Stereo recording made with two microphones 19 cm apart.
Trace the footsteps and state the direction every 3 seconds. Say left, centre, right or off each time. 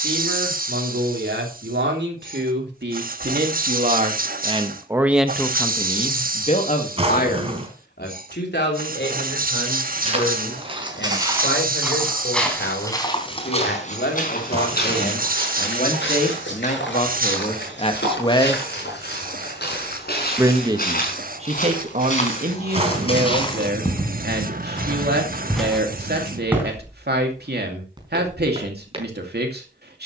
off, off, off, right, left, left, left, left, centre, right.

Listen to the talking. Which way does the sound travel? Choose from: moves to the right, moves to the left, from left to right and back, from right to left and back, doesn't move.
from right to left and back.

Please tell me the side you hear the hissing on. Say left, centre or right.
right.